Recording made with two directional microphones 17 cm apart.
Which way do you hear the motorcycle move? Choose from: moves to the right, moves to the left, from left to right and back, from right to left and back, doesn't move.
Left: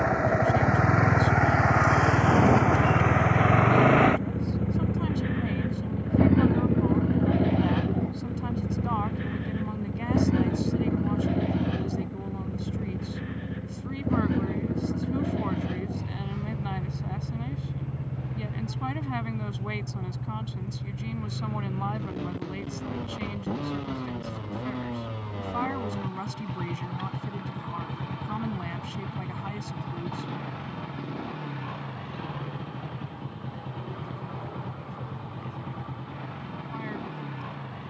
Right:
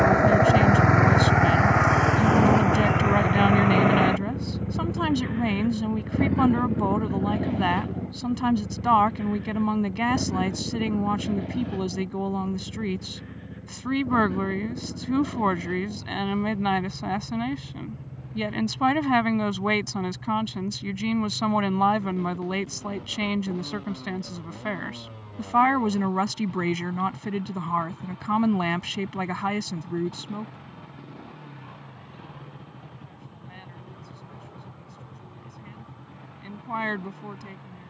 moves to the left.